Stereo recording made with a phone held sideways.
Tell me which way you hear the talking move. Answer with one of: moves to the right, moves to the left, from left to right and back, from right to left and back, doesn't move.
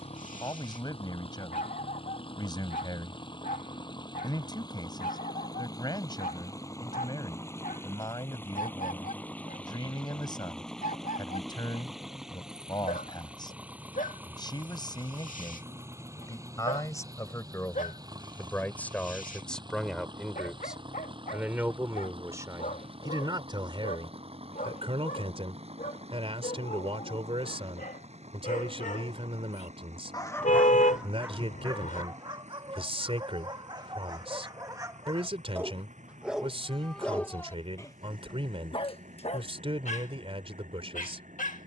moves to the right.